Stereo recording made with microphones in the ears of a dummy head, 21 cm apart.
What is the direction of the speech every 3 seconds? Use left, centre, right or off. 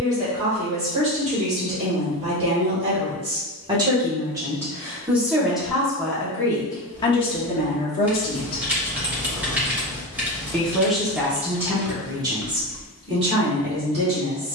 right, centre, left, centre, right.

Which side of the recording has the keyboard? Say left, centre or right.
centre.